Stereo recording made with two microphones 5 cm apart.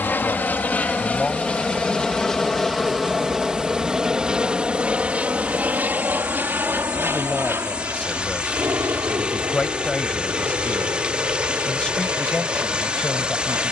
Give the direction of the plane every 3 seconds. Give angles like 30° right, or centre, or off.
20° left, 10° right, 40° right, 50° right, 60° right.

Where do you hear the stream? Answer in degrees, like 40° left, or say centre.
20° right.